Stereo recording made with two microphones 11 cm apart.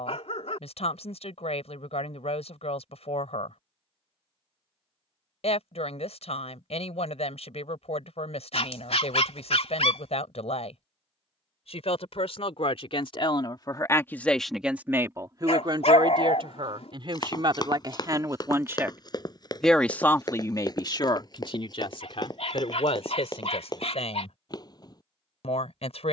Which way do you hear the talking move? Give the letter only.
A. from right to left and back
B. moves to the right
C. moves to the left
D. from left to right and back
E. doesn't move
D.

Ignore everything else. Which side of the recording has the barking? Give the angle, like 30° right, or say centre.
70° left.